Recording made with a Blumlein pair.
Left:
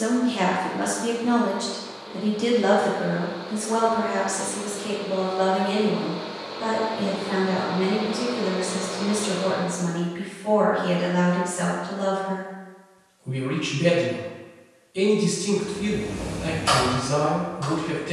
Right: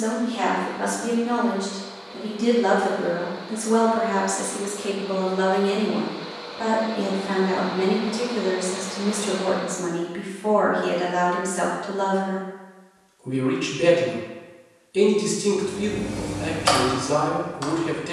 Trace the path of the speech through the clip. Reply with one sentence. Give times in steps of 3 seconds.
In this clip you hear the speech on the left from 0 s and on the right from 3 s.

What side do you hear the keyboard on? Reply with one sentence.
You can hear the keyboard on the right.